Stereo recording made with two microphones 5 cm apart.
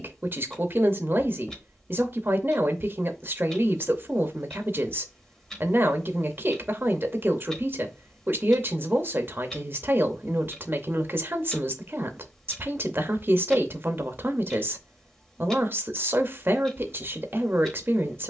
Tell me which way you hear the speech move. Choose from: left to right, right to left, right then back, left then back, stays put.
stays put.